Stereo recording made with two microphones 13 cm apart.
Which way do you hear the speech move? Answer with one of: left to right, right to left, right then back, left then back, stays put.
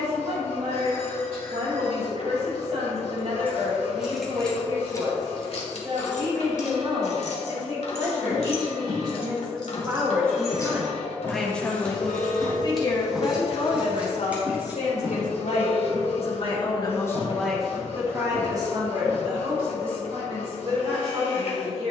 left then back.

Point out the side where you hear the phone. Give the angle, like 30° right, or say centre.
50° left.